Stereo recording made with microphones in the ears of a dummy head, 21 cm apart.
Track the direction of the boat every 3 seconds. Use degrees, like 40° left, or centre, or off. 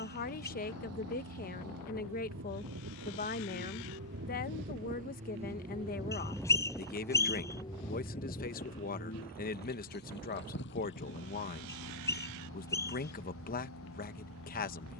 70° right, 40° right, 10° left, 50° left, 60° left.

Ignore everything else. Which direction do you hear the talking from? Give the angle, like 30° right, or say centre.
40° left.